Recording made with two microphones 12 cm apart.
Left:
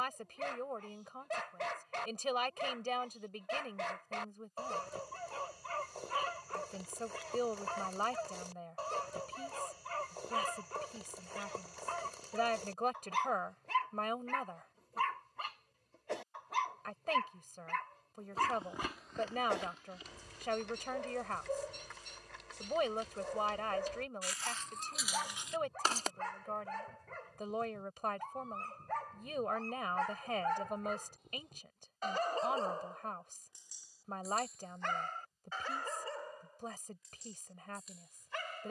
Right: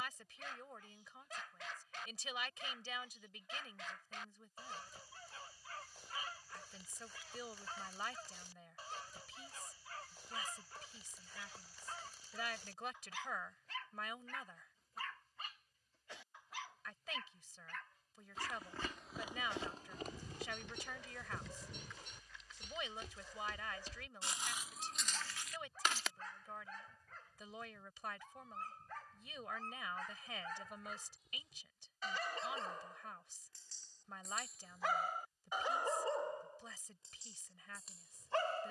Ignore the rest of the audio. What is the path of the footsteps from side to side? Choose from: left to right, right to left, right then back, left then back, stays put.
right then back.